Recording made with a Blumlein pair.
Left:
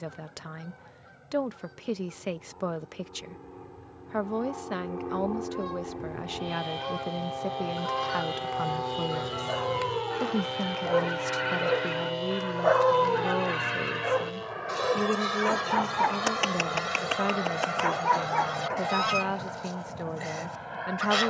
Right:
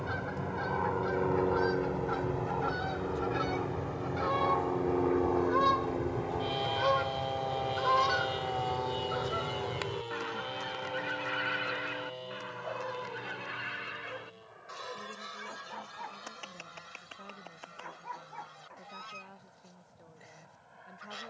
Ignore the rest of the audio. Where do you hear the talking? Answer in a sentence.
In this clip you hear the talking on the left.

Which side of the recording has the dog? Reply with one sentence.
In this clip you hear the dog on the left.